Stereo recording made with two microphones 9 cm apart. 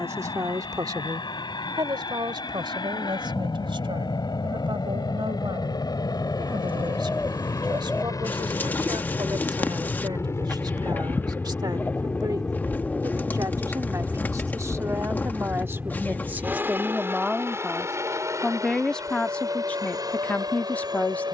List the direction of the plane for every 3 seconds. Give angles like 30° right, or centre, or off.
70° left, 60° left, 50° left, 30° left, 10° left, 20° right, 40° right.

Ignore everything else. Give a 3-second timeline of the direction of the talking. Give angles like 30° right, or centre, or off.
50° right, 70° right, 60° right, 60° right, 40° right, 20° right, 10° left.